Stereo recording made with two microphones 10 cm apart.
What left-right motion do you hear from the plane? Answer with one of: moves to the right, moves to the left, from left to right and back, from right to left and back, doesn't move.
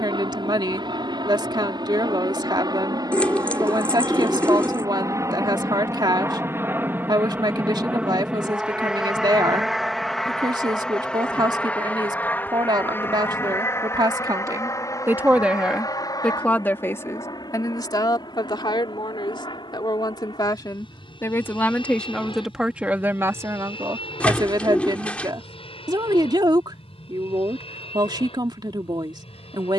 moves to the left.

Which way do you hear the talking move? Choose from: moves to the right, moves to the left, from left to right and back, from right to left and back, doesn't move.
from right to left and back.